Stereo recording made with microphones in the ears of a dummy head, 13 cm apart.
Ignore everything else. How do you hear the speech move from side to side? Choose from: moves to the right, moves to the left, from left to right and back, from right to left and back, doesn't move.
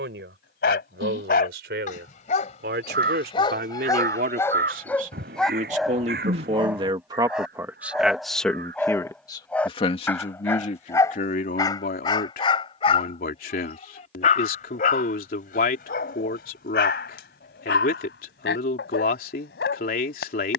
moves to the left.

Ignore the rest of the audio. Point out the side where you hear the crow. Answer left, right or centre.
right.